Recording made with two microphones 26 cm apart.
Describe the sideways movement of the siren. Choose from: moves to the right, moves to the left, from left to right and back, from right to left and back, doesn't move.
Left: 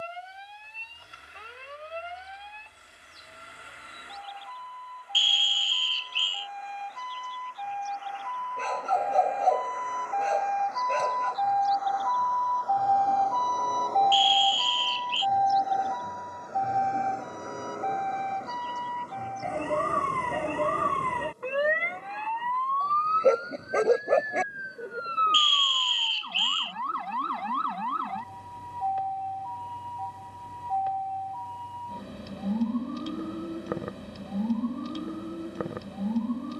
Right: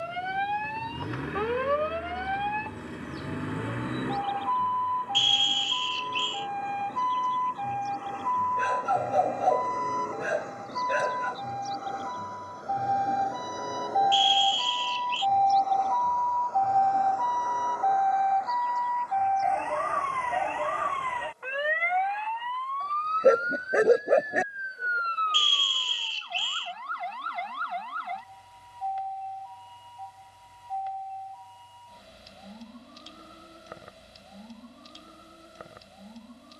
moves to the left.